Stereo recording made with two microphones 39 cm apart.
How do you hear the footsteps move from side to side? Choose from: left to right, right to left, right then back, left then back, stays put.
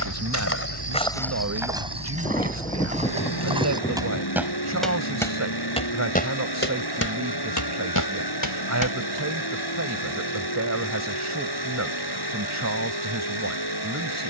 right then back.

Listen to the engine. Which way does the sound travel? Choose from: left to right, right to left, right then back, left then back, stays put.
stays put.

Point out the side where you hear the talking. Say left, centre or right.
right.